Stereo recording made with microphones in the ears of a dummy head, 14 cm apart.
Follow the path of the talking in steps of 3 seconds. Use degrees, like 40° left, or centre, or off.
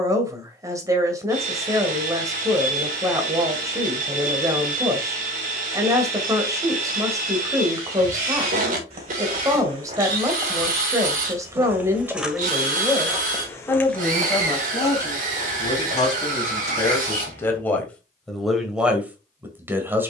20° right, 20° right, 20° right, 20° right, 10° left, 20° left, 10° right.